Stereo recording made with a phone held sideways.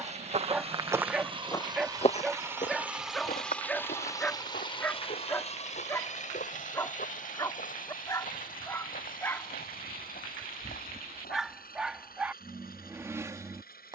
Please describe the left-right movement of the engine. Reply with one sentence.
You can hear the engine go from the right side to the left.